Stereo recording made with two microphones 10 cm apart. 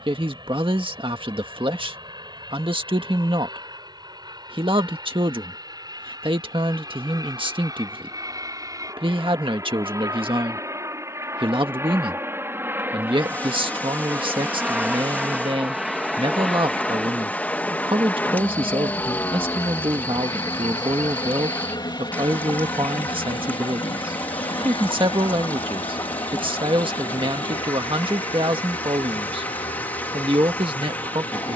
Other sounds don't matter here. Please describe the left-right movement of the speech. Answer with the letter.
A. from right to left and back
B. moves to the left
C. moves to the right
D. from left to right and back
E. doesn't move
E.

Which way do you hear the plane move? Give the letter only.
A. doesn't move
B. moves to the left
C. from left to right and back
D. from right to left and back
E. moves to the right
B.